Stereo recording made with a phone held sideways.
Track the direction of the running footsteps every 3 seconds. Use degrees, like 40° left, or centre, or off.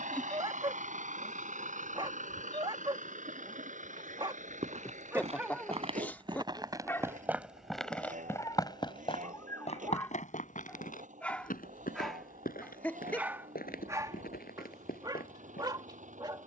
off, 50° right, centre, 60° left, 80° left, 80° left.